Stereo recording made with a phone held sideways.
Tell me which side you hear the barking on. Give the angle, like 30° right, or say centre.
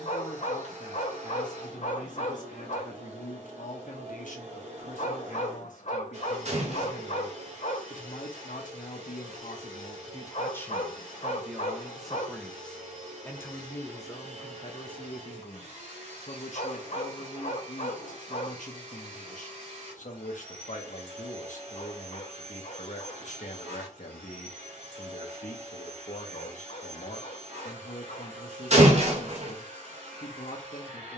50° left.